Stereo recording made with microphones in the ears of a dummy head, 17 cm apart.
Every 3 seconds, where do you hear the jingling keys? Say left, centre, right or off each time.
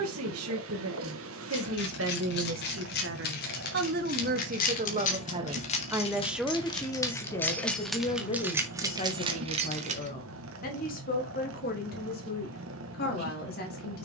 left, left, centre, right, off.